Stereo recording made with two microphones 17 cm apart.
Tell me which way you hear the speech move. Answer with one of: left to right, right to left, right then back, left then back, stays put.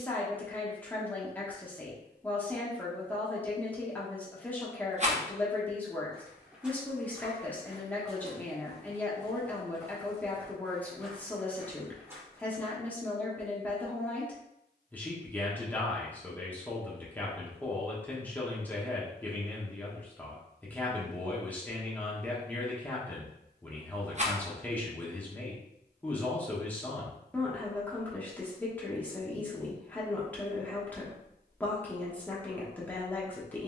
stays put.